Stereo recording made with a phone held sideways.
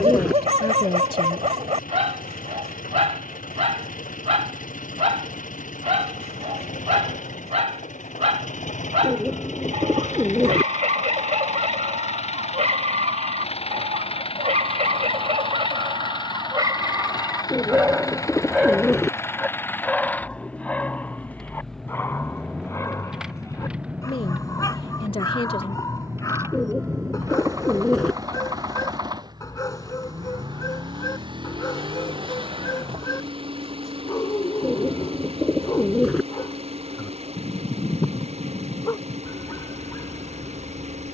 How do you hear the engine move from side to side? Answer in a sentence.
You can hear the engine travel towards the right.